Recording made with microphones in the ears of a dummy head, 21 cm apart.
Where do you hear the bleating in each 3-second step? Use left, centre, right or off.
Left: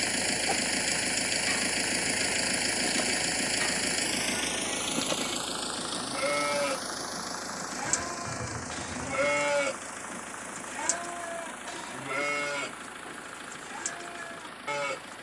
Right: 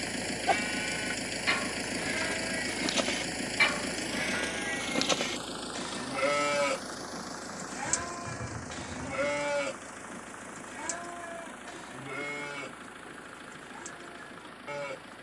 right, right, centre, left, left.